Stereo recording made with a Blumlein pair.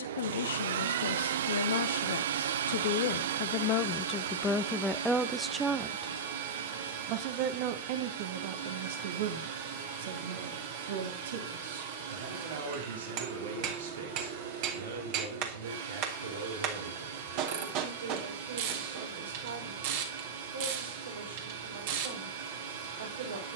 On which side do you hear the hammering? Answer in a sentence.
In this clip you hear the hammering on the right.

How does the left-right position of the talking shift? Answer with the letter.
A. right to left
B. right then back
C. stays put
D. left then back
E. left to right
E.